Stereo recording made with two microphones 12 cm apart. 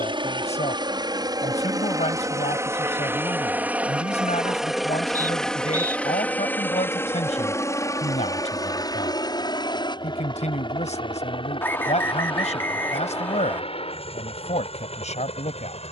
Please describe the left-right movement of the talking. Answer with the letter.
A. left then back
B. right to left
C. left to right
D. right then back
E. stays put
E.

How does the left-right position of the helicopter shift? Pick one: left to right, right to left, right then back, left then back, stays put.
right to left.